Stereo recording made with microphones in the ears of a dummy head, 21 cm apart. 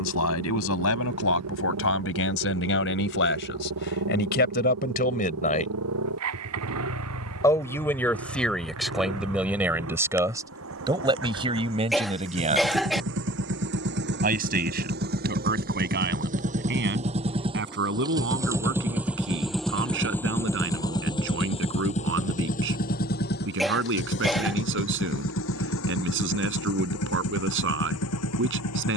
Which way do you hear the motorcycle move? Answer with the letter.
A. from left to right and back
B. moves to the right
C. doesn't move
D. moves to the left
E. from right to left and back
D.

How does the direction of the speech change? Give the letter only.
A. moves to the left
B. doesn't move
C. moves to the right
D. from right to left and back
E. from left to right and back
C.